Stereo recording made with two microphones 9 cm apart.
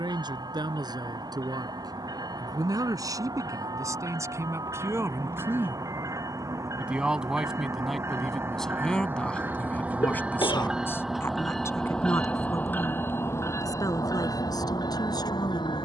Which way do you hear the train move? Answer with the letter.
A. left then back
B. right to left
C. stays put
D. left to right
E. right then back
B.